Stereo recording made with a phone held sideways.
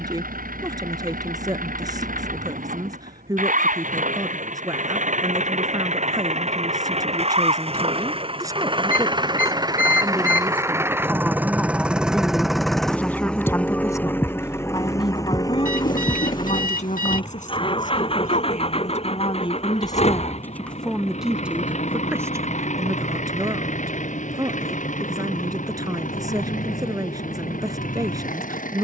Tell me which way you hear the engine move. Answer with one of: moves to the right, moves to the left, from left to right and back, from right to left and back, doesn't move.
moves to the left.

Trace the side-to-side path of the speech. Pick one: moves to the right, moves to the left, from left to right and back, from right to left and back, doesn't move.
from right to left and back.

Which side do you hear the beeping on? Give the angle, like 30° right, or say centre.
60° left.